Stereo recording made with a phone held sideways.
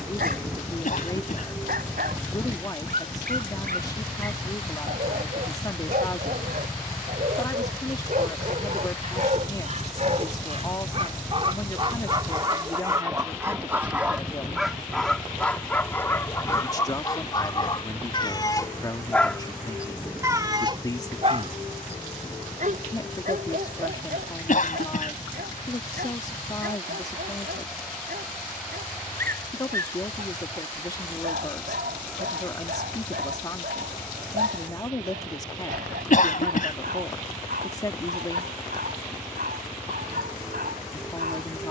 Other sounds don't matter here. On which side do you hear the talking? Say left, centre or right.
left.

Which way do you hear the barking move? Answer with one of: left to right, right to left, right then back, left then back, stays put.
left then back.